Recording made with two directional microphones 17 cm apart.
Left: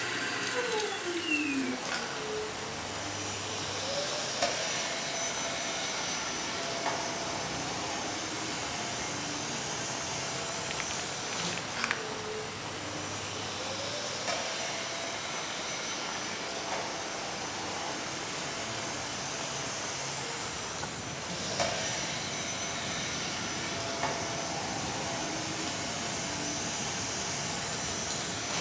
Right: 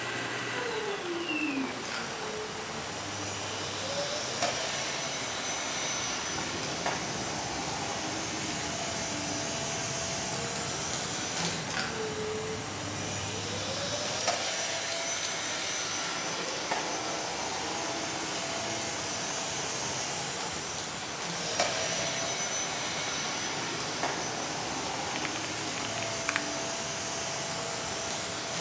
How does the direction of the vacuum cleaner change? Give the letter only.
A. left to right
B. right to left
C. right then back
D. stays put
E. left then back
C.